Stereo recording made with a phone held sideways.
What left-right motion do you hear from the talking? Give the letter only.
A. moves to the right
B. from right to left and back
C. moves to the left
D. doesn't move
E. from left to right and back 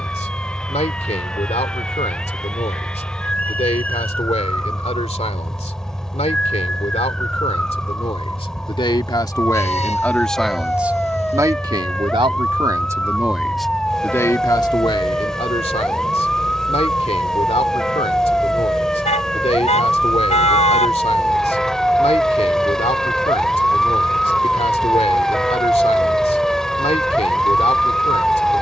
E.